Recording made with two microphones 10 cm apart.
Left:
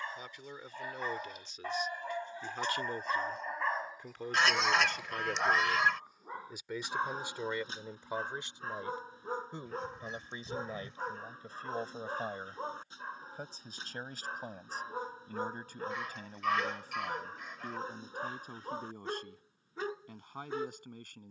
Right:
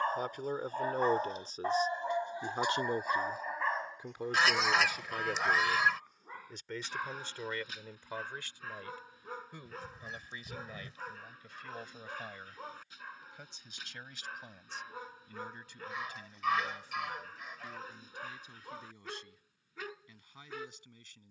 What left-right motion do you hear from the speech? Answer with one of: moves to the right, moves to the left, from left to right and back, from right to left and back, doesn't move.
moves to the left.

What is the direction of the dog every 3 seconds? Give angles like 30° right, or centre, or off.
30° right, 10° left, 30° left, 30° left, 30° left, 30° left, 30° left.